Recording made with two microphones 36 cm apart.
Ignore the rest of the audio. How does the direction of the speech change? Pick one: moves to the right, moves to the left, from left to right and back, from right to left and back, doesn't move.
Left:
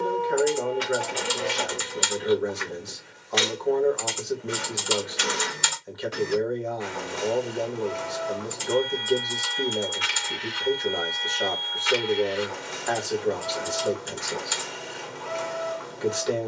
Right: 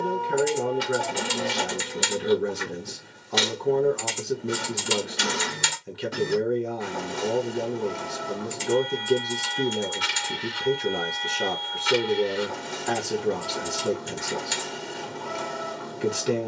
doesn't move.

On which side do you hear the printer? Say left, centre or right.
right.